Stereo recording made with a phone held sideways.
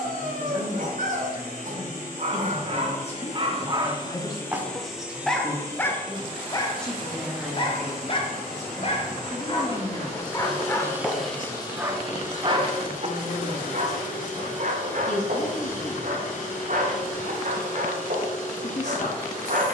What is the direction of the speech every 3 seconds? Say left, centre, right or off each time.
left, left, centre, left, left, left, left.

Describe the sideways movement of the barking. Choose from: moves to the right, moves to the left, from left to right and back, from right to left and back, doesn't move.
from right to left and back.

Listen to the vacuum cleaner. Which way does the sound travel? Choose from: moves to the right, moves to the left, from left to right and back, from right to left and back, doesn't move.
from left to right and back.